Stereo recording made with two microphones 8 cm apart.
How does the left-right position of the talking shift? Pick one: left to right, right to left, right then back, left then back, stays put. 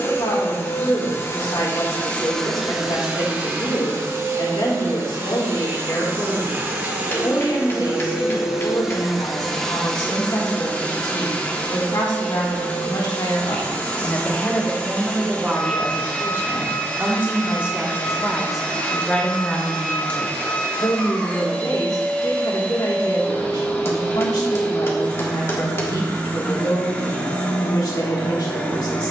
right then back.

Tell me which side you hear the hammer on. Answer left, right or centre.
left.